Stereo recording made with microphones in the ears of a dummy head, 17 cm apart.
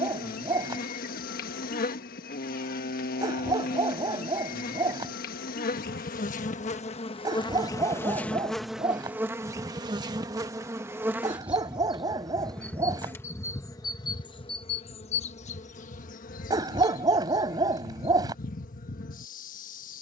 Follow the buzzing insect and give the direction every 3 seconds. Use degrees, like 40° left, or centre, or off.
50° left, 50° left, 20° left, 10° right, 20° left, 40° left, 40° left.